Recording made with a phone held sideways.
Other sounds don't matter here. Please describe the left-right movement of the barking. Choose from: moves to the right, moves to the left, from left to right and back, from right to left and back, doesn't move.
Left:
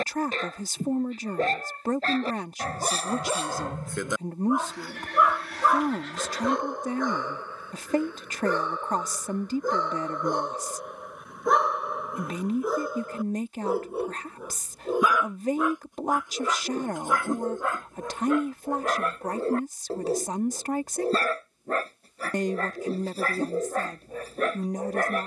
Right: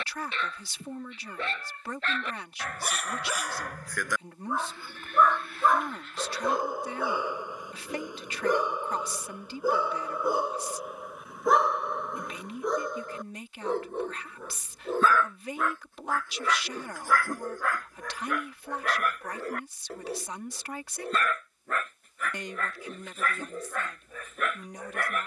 from left to right and back.